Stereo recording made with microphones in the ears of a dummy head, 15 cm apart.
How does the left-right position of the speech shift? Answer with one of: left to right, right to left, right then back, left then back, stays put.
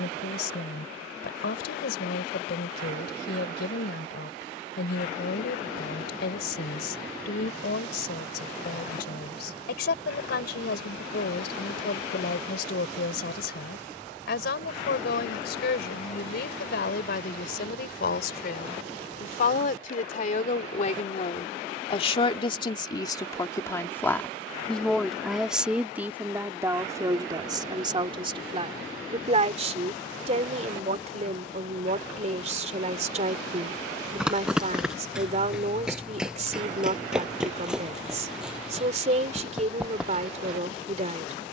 left to right.